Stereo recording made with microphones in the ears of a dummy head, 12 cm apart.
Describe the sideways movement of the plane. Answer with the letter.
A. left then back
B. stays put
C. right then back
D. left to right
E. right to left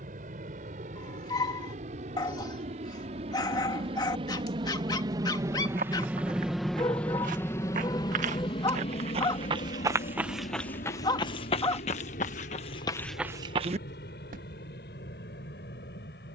E.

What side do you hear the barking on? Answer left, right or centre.
left.